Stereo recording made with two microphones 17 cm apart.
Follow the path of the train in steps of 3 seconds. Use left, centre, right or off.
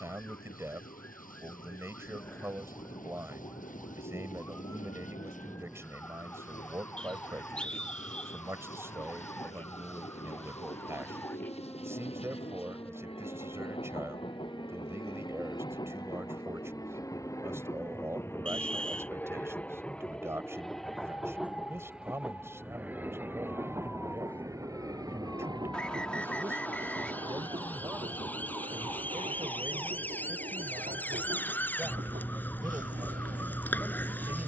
left, left, left, left, left, left, centre, centre, right, right, right, right.